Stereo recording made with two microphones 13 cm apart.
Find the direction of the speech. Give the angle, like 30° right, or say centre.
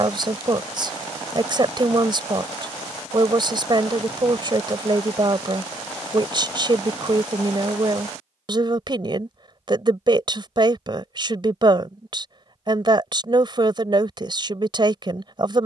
40° right.